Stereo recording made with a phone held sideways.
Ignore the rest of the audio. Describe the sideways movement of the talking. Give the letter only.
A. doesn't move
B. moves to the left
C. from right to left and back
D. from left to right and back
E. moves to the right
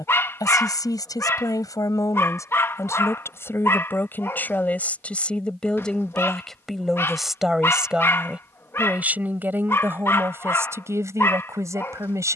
E.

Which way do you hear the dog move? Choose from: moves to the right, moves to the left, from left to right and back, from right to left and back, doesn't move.
doesn't move.